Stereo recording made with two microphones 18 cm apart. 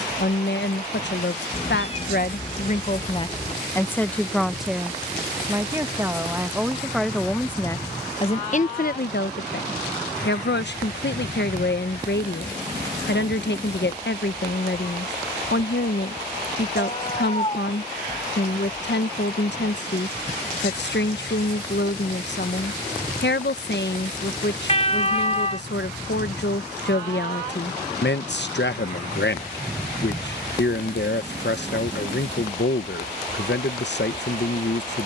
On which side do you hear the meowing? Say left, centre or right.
left.